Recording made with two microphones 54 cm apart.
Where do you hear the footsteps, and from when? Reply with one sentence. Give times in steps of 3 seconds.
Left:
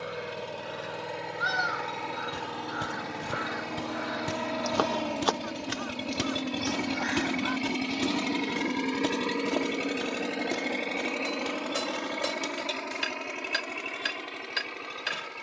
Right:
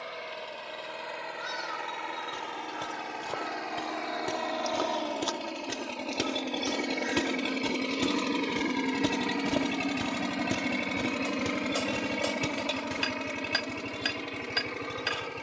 In this clip you hear the footsteps on the left from 0 s, in the centre from 6 s and on the right from 9 s.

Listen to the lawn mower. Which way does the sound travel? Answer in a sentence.
In this clip you hear the lawn mower travel towards the right.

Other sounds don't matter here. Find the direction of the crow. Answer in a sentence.
In this clip you hear the crow on the left.